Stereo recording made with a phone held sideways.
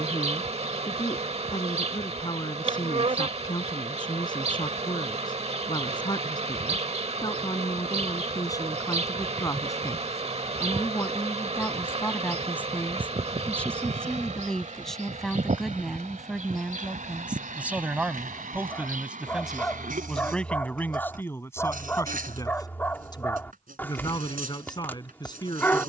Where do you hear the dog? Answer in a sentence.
In this clip you hear the dog in the centre.